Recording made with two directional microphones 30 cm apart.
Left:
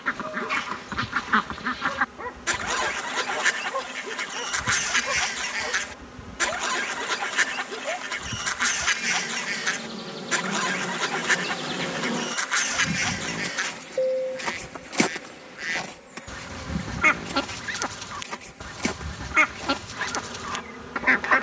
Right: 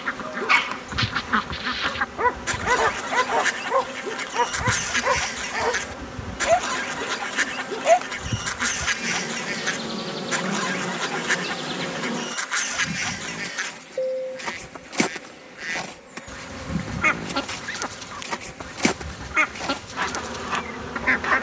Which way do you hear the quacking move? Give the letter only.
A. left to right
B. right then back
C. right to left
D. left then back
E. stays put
E.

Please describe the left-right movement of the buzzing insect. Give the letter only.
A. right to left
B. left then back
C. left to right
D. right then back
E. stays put
B.